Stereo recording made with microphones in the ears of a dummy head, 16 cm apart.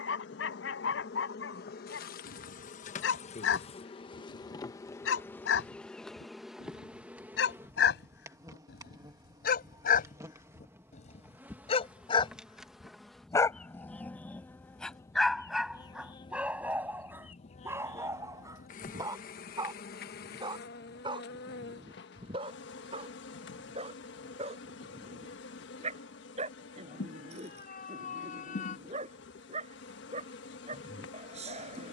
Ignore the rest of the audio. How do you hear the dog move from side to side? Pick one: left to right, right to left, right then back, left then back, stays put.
left to right.